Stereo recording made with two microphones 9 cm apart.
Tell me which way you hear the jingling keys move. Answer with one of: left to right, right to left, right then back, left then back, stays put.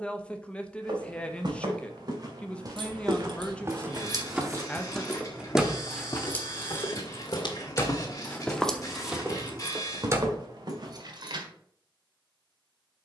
left then back.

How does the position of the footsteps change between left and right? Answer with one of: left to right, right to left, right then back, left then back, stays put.
left then back.